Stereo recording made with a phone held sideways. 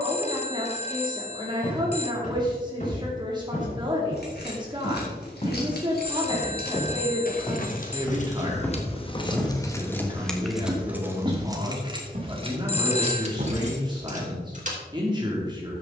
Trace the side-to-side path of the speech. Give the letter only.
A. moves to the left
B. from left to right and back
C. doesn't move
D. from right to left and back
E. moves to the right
C.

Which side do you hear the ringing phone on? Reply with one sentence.
You can hear the ringing phone on the left.